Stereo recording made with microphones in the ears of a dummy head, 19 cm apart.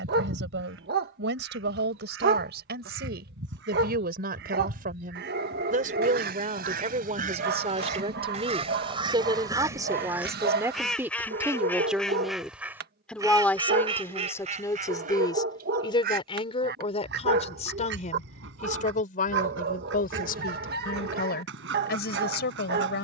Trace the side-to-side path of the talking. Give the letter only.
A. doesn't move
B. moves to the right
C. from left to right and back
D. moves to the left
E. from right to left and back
D.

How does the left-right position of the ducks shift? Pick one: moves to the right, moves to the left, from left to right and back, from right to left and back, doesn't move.
from right to left and back.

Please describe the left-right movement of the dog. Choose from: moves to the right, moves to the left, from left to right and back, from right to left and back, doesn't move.
doesn't move.